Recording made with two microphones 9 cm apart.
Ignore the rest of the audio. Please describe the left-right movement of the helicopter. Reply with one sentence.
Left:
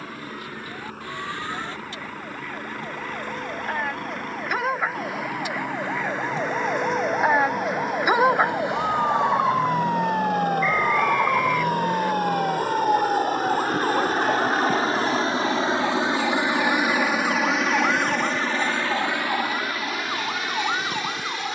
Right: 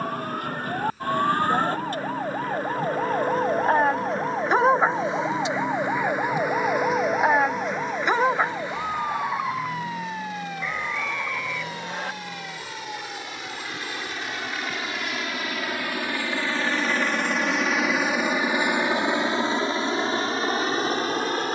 You can hear the helicopter travel towards the right.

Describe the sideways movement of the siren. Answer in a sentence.
You can hear the siren move from right to left.